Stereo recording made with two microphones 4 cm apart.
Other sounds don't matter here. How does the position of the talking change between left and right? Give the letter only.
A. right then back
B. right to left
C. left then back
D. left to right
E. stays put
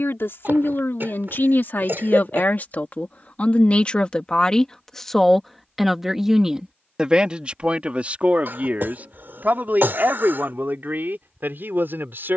D.